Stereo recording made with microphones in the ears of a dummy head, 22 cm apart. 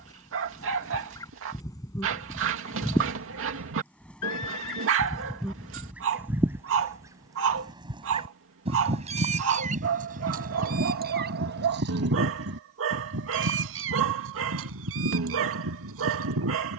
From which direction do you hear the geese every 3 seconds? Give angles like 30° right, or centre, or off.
10° left, centre, 20° right, 40° right, 60° right, 70° right.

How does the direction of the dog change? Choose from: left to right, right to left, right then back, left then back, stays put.
stays put.